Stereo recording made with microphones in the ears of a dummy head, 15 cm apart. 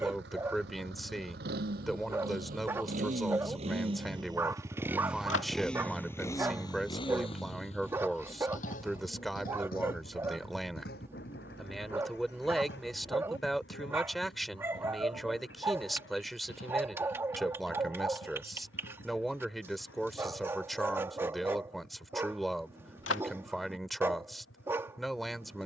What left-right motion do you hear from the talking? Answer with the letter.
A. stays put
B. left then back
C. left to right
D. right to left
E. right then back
A.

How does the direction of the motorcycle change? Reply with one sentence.
You can hear the motorcycle move to the left.